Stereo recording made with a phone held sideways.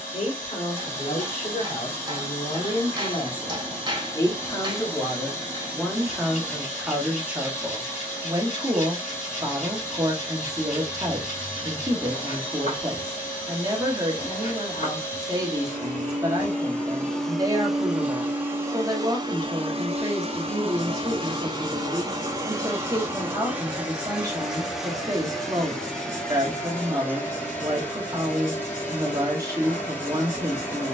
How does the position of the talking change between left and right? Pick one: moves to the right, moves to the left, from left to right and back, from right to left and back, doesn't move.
moves to the right.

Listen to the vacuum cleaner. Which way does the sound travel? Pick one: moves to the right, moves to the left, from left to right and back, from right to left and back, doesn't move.
from left to right and back.